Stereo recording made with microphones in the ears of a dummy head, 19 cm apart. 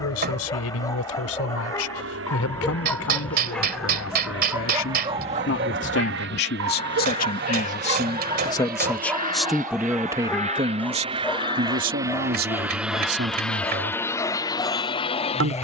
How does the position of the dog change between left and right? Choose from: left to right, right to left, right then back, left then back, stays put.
right then back.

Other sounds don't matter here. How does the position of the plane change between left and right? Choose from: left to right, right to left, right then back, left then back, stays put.
right to left.